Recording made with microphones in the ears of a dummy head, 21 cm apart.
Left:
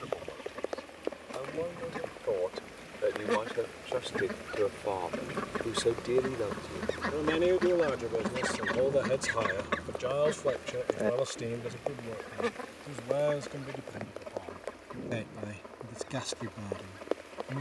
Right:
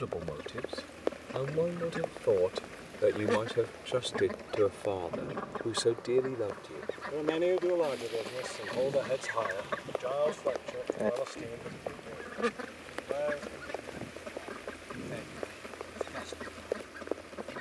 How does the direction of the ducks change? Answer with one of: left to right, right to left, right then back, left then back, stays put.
left then back.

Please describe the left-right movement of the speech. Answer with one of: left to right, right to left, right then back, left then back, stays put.
right to left.